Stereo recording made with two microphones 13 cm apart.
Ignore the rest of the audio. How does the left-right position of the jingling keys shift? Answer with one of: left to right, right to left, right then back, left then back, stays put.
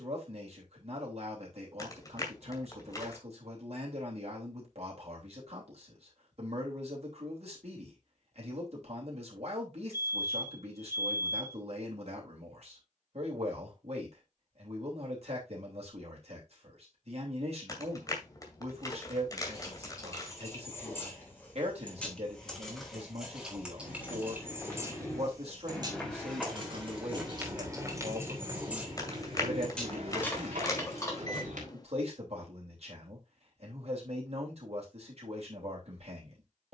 right then back.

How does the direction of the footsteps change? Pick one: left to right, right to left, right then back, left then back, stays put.
left to right.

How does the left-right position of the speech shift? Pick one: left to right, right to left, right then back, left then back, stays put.
stays put.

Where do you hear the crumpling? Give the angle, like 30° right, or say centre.
30° left.